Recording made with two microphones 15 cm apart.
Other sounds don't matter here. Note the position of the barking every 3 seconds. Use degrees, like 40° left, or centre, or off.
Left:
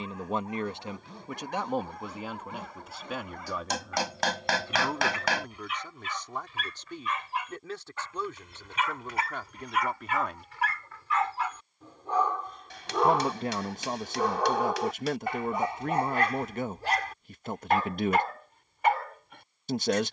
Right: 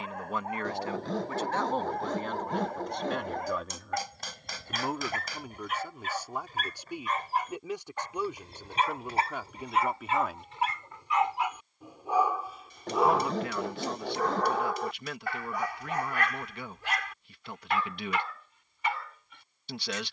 50° right, 50° right, 40° right, 20° right, centre, 30° left, 50° left.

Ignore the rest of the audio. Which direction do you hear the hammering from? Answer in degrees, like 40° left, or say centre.
80° left.